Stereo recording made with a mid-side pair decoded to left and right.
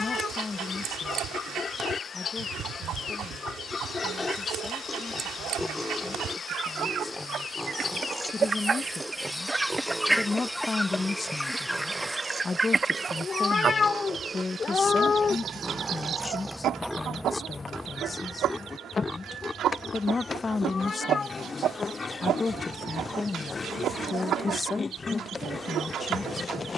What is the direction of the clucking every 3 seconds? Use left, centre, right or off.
right, right, right, centre, right, right, right, right, right.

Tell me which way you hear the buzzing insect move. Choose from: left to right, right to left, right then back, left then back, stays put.
right then back.